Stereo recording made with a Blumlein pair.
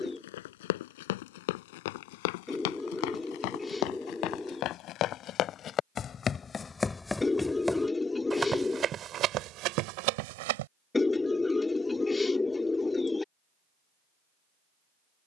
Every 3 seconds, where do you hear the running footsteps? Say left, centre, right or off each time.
left, left, centre, right, off.